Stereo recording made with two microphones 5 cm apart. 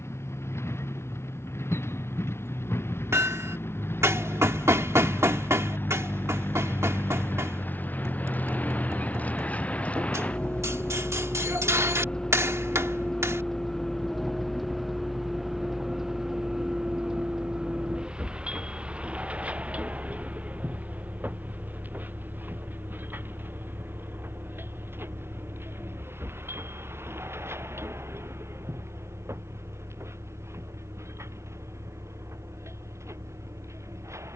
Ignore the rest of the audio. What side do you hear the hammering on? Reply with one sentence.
You can hear the hammering on the right.